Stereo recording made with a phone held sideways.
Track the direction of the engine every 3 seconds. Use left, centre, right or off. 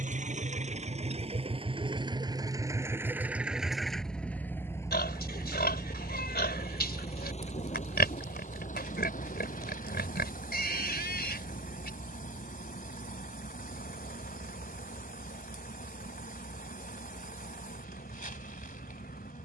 right, centre, left, left, left, left, left.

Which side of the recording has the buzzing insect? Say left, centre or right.
left.